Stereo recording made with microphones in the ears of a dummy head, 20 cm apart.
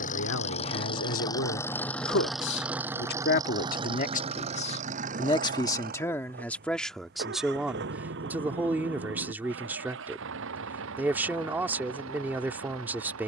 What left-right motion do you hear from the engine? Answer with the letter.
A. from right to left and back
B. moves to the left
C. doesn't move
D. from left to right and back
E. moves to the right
E.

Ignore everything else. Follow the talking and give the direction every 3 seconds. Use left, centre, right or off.
left, left, centre, centre, centre.